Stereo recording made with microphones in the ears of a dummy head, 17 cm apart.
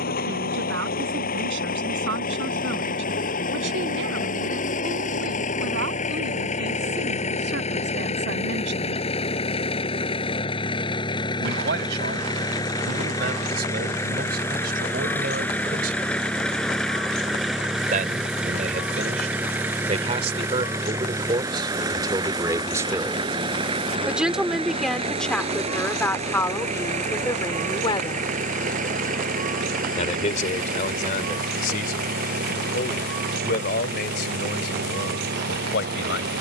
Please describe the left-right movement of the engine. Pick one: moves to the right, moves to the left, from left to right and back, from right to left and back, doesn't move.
moves to the right.